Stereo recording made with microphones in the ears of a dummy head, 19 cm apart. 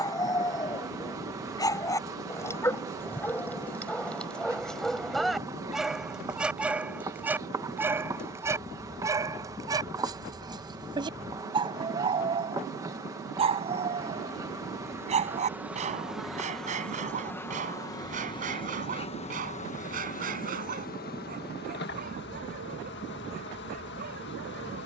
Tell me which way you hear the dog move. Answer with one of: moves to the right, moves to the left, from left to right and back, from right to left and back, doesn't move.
moves to the right.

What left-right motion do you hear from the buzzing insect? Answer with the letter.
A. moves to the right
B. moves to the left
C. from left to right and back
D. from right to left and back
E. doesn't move
B.